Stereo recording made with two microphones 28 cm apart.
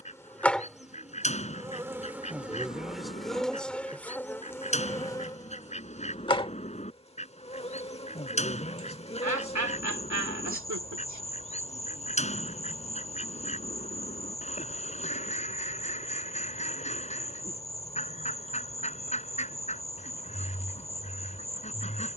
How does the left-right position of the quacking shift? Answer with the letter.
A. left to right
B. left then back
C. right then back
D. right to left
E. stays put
E.